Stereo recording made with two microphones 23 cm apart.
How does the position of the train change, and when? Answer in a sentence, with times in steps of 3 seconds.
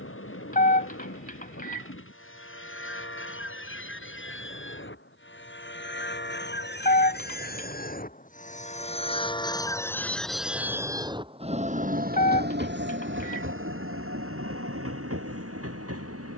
You can hear the train on the left from 0 s, in the centre from 9 s and on the right from 12 s.